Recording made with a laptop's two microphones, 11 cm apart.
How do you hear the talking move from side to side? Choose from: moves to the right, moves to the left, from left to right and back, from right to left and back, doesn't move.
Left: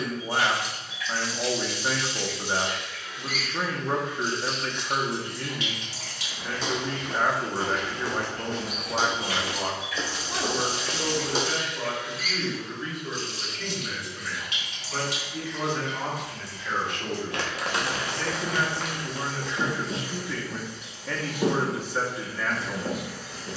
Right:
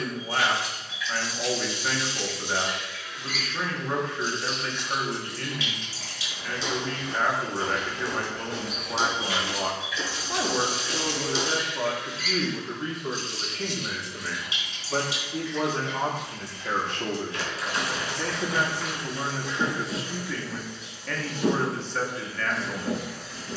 from left to right and back.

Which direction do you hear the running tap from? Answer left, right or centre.
left.